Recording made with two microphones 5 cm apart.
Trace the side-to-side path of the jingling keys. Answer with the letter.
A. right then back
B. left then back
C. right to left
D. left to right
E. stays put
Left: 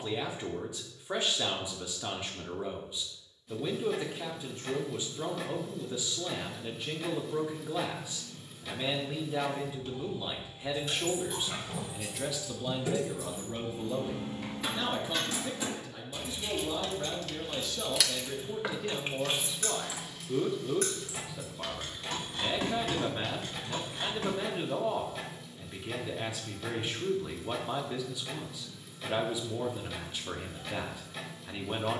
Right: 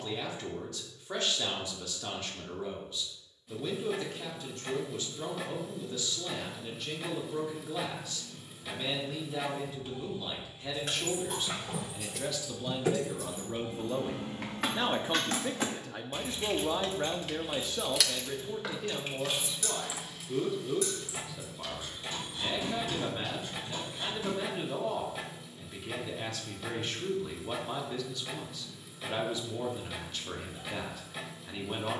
C.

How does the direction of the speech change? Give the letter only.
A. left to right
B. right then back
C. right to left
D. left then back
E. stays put
B.